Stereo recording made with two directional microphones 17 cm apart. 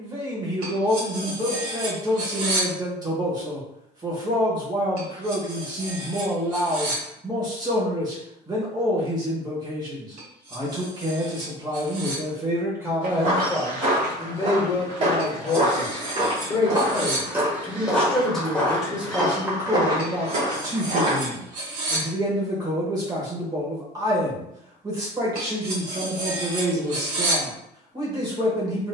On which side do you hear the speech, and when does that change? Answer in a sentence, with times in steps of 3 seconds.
In this clip you hear the speech on the right from 0 s, in the centre from 12 s, on the left from 15 s, in the centre from 18 s and on the right from 21 s.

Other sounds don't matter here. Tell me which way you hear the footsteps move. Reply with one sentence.
You can hear the footsteps move from right to left and back again.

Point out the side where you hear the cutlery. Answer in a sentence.
You can hear the cutlery on the right.